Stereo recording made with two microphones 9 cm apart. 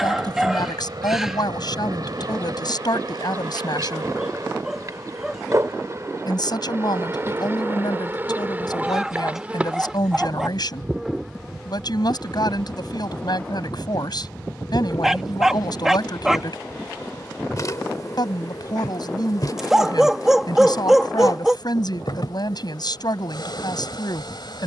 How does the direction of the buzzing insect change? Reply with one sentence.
You can hear the buzzing insect travel towards the left.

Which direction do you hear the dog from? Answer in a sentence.
You can hear the dog in the centre.